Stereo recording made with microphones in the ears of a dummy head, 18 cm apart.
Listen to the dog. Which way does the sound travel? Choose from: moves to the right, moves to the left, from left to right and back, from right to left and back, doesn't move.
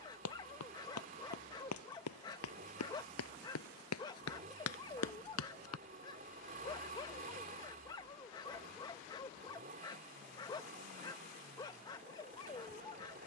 doesn't move.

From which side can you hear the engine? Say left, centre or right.
right.